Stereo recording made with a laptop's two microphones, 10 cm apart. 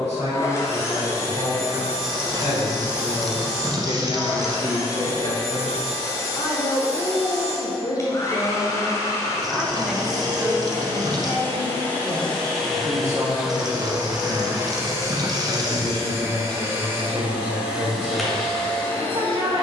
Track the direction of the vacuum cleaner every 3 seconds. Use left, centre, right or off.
left, left, left, left, centre, right, centre.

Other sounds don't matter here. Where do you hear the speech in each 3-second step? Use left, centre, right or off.
left, left, left, centre, right, right, right.